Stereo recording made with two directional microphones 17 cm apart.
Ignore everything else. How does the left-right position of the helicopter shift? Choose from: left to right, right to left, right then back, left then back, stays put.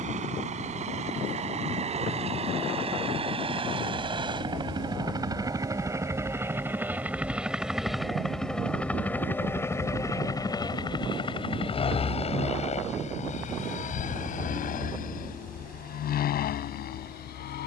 right to left.